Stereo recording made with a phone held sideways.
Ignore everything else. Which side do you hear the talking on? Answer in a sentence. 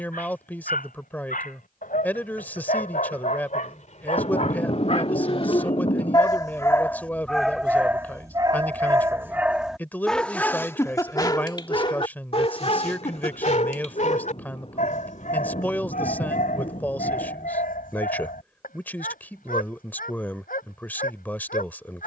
You can hear the talking in the centre.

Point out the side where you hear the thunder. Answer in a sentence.
You can hear the thunder on the left.